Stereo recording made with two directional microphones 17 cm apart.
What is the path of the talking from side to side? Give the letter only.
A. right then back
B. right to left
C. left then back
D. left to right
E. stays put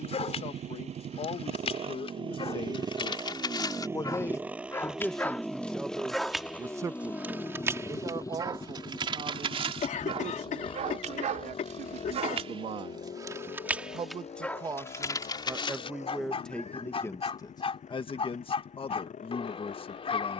A.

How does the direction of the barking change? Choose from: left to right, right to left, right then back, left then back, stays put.
right then back.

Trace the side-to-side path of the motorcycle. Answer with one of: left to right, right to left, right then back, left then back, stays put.
right to left.